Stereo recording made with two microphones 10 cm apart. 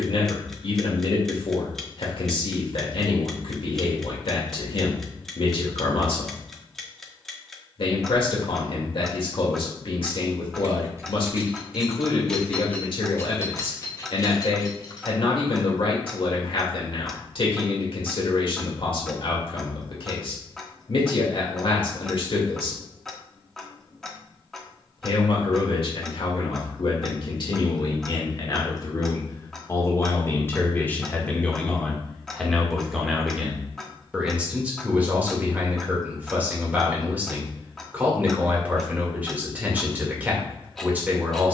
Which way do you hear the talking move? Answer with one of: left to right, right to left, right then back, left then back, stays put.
left to right.